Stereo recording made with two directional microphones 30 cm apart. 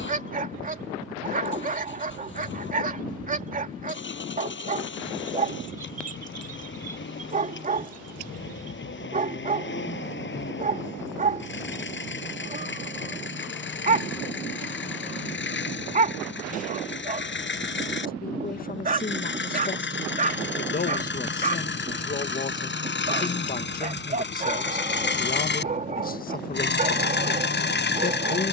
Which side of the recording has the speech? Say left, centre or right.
left.